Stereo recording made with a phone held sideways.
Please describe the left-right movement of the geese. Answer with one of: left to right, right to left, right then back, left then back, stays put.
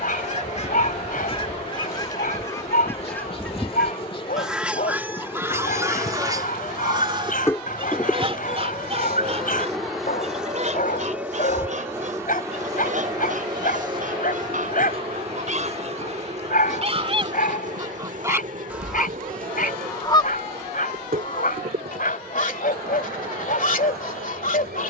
right then back.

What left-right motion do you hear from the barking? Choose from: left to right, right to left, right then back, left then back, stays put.
stays put.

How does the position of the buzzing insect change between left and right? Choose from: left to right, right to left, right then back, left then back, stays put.
left to right.